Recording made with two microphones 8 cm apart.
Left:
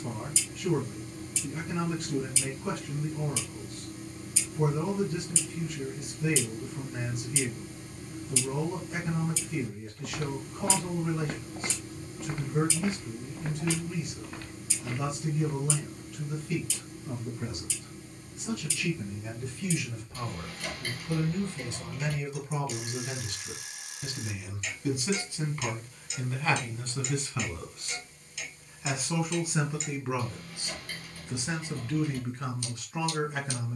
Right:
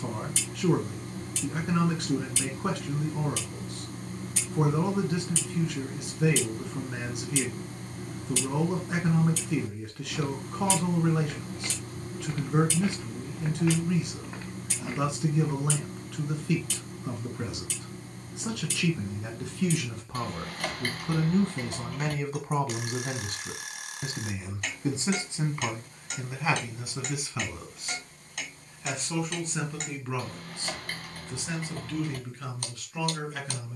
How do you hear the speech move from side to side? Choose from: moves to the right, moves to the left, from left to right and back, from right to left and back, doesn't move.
moves to the left.